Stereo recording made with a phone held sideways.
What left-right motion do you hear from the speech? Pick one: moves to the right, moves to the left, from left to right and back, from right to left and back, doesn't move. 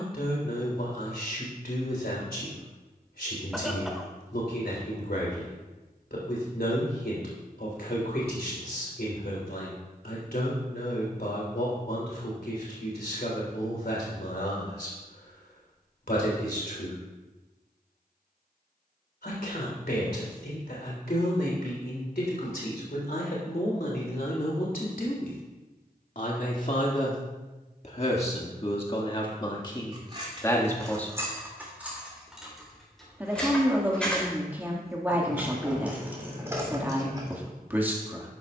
moves to the right.